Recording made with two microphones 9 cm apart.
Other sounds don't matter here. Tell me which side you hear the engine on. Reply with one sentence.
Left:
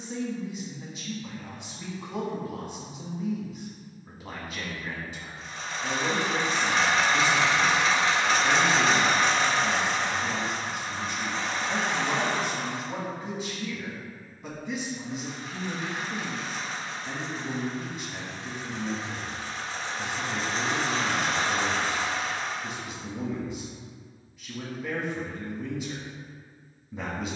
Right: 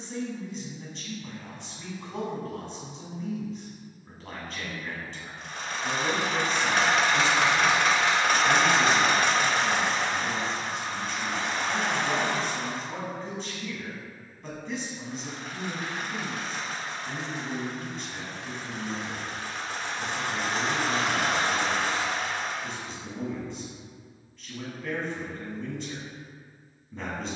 In this clip you hear the engine on the right.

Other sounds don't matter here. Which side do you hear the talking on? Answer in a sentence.
In this clip you hear the talking in the centre.